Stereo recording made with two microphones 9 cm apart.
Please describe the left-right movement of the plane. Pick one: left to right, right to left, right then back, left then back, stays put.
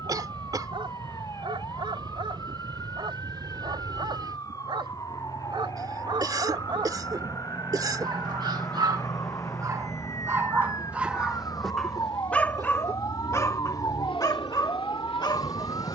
right to left.